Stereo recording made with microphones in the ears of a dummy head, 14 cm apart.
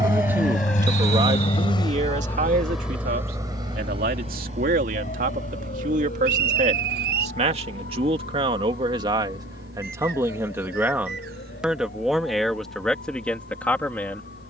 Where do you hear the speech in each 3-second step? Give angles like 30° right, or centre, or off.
40° right, 60° right, 40° right, 20° right, 10° left.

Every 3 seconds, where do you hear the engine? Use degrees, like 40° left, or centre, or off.
30° left, 40° right, 70° right, 70° right, 80° right.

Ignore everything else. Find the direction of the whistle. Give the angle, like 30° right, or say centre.
70° right.